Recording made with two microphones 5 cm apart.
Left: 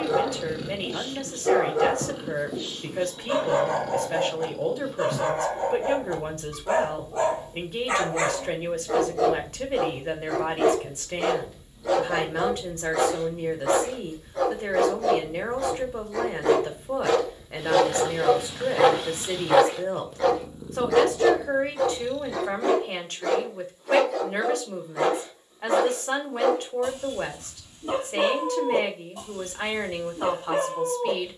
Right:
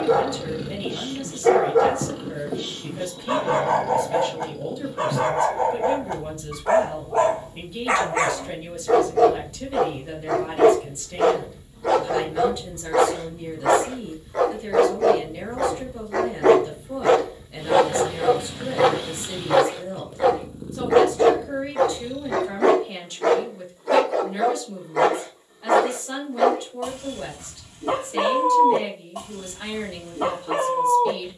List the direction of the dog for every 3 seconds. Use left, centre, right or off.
right, right, right, right, right, right, centre, right, right, right, right.